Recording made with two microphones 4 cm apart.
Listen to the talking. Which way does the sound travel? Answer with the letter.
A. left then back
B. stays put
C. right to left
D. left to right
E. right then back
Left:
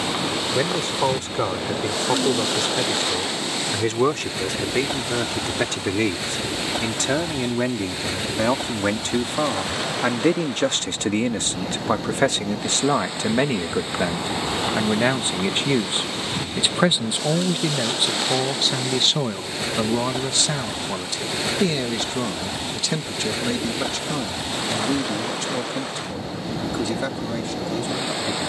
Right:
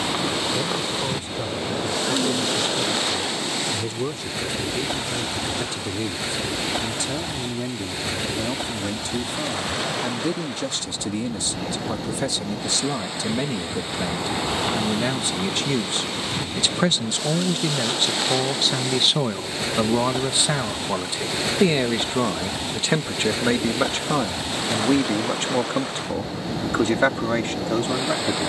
D.